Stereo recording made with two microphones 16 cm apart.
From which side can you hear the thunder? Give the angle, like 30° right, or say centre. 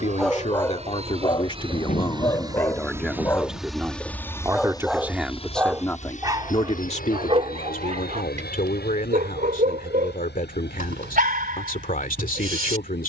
50° left.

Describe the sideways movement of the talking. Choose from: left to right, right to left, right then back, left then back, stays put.
right then back.